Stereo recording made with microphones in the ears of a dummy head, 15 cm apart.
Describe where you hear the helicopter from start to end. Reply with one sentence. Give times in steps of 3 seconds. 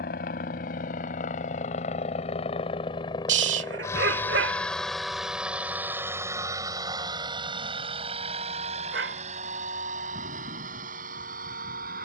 In this clip you hear the helicopter on the left from 0 s, in the centre from 3 s and on the right from 6 s.